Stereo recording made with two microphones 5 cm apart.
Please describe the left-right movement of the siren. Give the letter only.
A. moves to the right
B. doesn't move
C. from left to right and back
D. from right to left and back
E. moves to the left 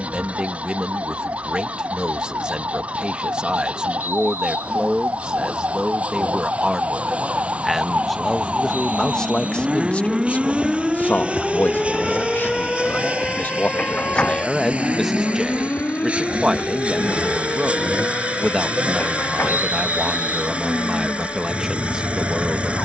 E.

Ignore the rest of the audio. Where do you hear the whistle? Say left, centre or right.
right.